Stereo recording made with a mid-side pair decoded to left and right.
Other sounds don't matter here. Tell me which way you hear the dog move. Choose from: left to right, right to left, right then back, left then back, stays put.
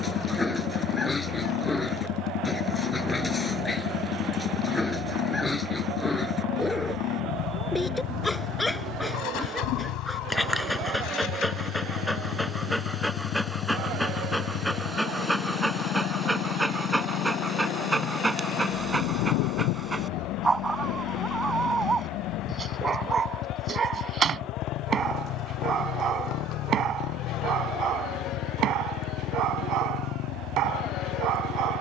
left to right.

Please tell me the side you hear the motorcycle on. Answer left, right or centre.
left.